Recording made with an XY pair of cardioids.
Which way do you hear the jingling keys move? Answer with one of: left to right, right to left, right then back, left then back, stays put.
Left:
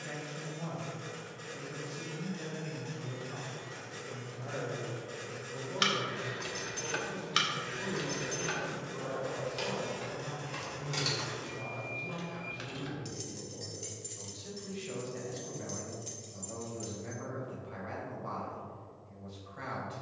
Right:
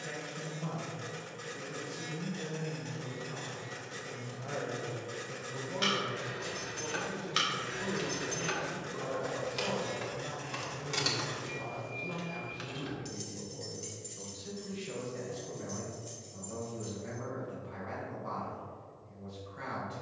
right then back.